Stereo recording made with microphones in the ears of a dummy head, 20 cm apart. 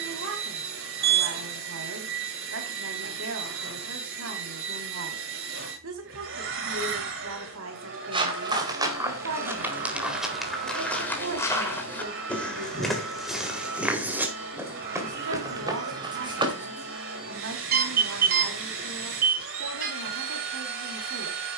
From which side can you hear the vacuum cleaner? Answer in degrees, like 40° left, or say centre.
60° right.